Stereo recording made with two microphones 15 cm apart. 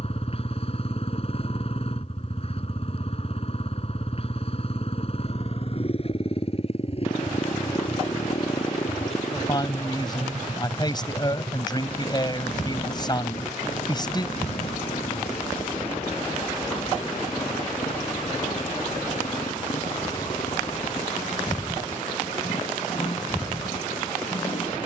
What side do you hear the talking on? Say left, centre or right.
left.